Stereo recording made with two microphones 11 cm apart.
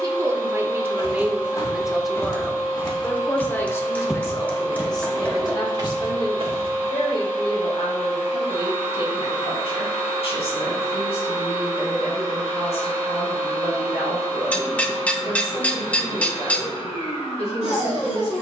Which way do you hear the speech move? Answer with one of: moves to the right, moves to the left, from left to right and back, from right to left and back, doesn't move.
moves to the left.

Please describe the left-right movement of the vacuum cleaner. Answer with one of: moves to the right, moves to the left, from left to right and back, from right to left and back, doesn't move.
doesn't move.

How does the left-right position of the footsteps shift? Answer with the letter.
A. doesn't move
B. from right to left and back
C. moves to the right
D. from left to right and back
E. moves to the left
C.